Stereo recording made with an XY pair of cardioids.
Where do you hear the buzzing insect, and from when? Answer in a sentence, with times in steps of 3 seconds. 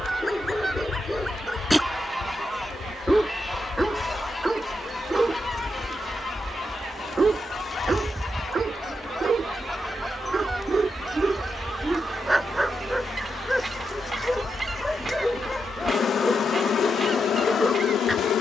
You can hear the buzzing insect on the left from 0 s, in the centre from 6 s and on the left from 12 s.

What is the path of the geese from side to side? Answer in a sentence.
In this clip you hear the geese move from right to left and back again.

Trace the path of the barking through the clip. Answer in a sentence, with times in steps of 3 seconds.
In this clip you hear the barking in the centre from 0 s, on the right from 6 s and in the centre from 12 s.